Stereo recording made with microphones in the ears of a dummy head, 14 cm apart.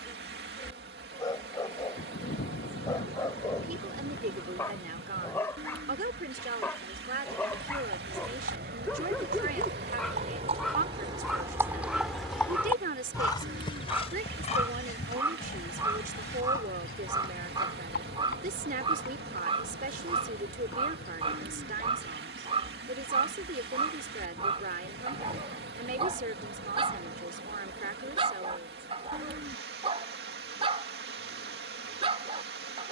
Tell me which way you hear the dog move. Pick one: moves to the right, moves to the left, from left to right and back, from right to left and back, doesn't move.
moves to the right.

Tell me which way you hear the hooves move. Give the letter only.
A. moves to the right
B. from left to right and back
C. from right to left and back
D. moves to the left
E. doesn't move
D.